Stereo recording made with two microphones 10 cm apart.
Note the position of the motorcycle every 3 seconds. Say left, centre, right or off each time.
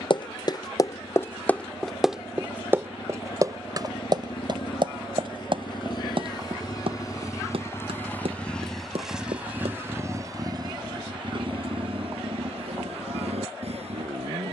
left, left, left, right, right.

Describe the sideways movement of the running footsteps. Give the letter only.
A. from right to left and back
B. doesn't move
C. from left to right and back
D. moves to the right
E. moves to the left
D.